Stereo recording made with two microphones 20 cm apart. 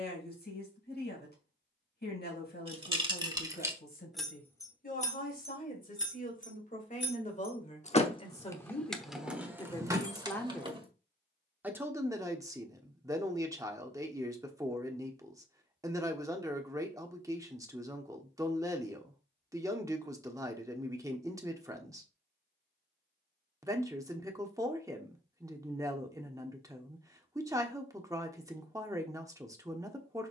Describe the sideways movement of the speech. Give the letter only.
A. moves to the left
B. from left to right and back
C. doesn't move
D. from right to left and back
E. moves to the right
E.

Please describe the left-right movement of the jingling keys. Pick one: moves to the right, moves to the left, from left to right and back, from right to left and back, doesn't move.
from right to left and back.